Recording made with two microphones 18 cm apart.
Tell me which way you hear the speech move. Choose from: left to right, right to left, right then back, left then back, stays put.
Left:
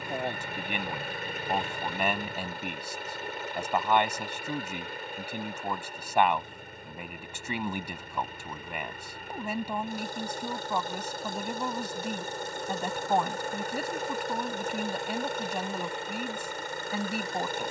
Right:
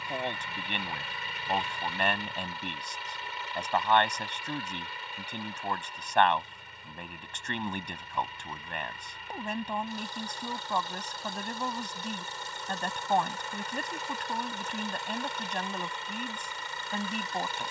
stays put.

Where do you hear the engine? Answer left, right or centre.
left.